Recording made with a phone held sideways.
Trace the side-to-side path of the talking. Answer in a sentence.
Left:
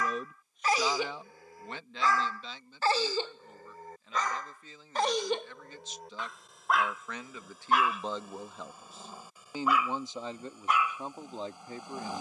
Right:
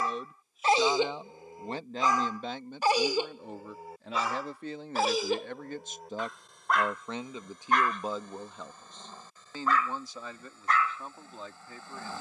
In this clip you hear the talking go right and come back.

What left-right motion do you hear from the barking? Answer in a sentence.
You can hear the barking move from right to left.